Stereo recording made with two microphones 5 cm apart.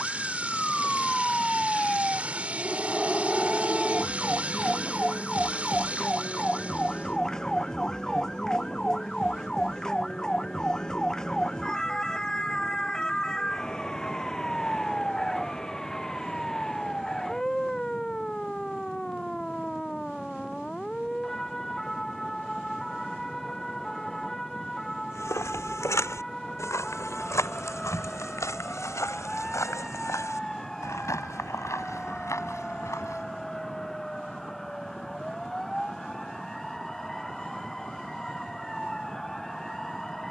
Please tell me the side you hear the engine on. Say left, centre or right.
right.